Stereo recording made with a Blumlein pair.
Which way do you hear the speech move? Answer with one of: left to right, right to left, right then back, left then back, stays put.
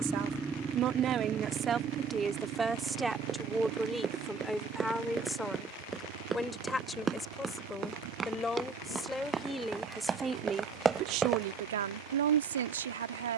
left then back.